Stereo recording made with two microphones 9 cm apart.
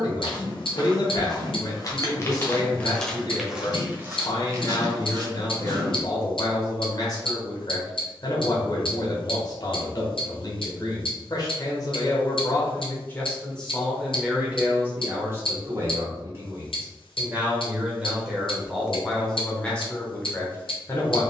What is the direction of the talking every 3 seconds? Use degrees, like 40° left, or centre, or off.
40° left, 40° left, 40° left, 40° left, 10° left, 30° right, 10° left.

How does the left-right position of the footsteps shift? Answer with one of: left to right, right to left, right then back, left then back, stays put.
left to right.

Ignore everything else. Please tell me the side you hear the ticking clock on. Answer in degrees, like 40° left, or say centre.
70° left.